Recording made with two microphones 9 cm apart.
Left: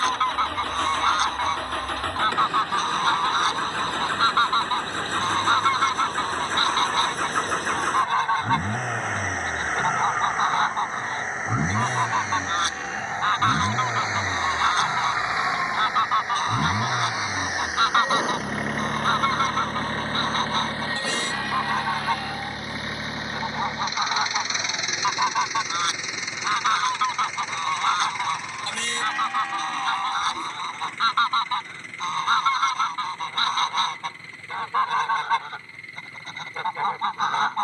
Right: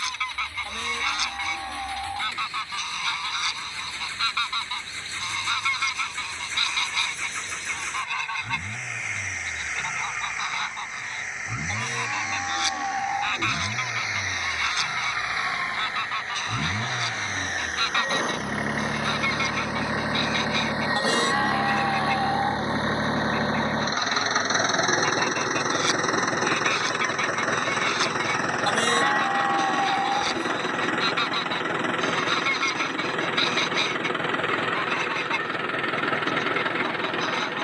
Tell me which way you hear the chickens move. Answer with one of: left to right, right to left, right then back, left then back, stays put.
stays put.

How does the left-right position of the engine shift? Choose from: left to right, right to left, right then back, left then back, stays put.
left to right.